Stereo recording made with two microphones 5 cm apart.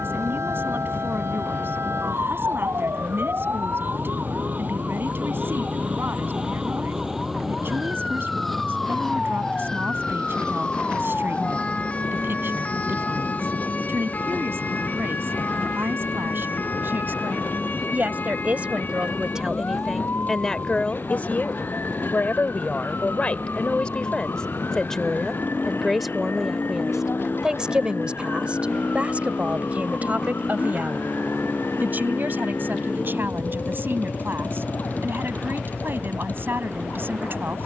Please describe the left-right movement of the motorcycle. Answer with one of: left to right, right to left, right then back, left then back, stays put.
stays put.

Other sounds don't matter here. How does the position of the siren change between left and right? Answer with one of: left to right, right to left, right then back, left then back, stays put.
right to left.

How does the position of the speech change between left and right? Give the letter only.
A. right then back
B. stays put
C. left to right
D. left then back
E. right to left
D.